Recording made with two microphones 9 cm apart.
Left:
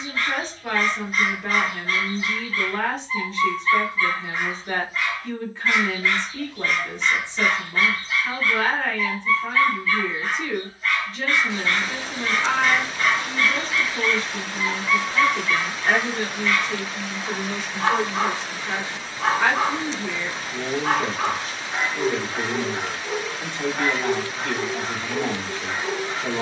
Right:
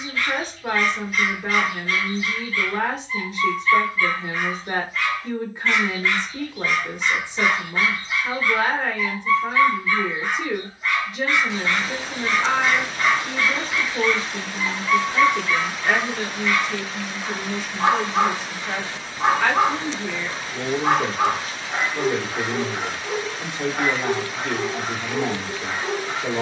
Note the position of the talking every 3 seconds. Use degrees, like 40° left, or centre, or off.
20° right, 20° right, 20° right, 20° right, 20° right, 20° left, 10° left, 10° right, 10° right.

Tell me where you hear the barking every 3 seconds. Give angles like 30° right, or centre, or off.
40° left, 20° left, 10° right, 20° right, 20° right, 20° right, 20° right, 20° right, 20° right.